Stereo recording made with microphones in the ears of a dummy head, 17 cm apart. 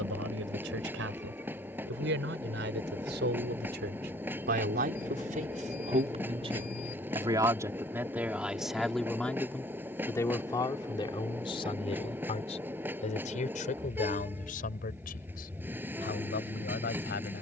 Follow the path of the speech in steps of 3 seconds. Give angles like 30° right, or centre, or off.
70° right, 50° right, 20° right, 20° left, 40° left, 50° left.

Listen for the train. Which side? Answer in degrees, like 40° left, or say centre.
10° right.